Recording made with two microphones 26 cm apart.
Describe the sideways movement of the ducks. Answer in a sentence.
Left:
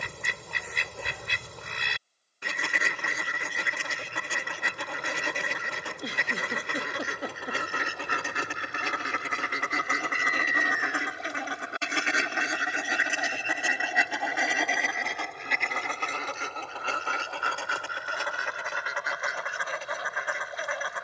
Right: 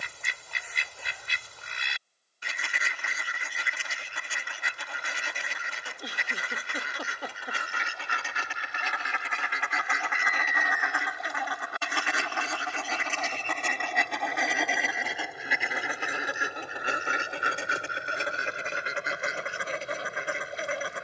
In this clip you hear the ducks move from left to right.